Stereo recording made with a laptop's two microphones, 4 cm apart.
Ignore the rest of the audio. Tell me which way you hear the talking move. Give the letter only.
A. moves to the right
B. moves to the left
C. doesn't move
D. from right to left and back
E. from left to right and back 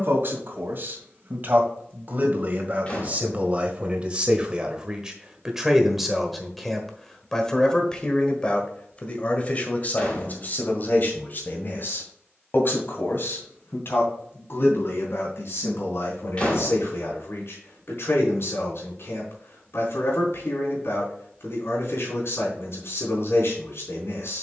B.